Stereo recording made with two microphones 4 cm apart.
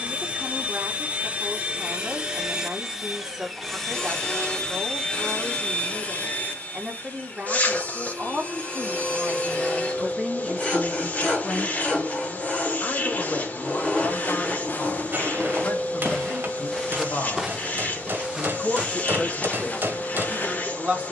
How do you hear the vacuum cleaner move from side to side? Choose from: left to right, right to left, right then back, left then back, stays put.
right to left.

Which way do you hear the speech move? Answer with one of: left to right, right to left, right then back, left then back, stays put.
left then back.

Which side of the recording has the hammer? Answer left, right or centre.
right.